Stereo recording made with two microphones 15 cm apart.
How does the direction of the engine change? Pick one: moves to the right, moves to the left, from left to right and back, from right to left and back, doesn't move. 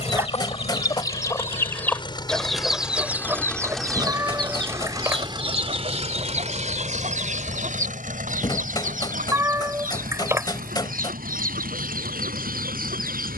moves to the right.